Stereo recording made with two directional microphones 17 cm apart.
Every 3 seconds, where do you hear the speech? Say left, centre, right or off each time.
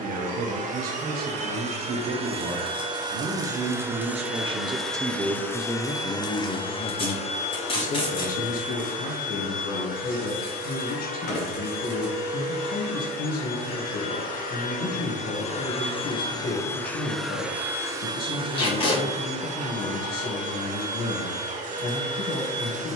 right, right, left, left, left, left, left, left.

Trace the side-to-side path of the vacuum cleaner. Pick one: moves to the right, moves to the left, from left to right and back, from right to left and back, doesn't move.
from right to left and back.